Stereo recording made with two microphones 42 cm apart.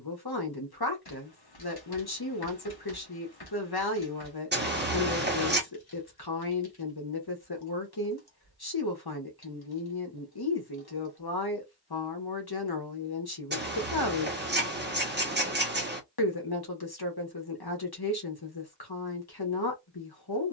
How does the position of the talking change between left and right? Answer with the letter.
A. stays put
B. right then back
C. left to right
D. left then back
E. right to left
A.